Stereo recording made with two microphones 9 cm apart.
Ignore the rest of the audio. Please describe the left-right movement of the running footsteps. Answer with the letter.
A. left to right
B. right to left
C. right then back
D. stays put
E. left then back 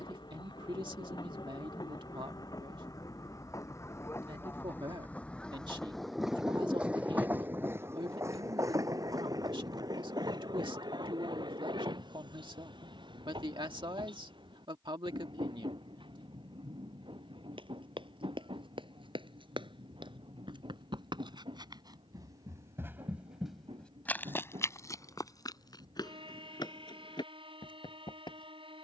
B.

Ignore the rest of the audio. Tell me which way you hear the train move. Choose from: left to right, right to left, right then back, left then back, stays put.
left to right.